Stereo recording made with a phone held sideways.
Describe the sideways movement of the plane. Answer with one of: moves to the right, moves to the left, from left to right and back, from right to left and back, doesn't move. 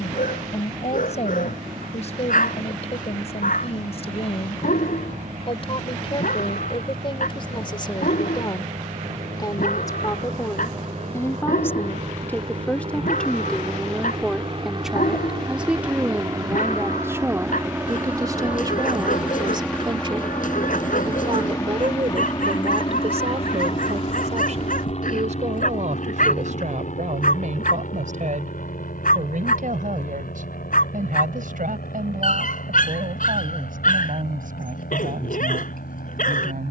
moves to the left.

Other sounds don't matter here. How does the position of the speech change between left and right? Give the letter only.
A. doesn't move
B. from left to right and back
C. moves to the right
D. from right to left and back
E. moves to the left
C.